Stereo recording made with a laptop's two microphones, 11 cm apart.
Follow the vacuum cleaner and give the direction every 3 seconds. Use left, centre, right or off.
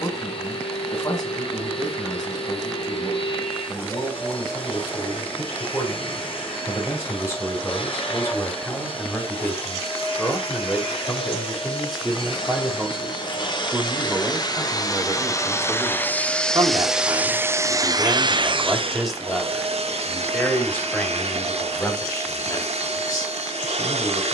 left, left, left, left, left, centre, right, right.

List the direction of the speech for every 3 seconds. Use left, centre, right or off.
left, left, left, centre, centre, right, centre, left.